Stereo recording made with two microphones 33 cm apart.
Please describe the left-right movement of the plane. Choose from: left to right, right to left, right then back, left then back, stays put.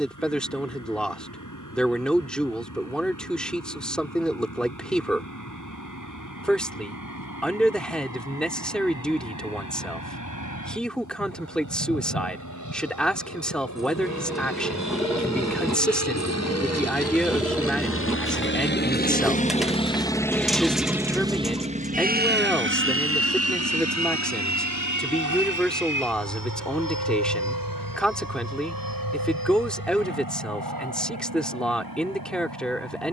left to right.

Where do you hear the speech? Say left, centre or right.
centre.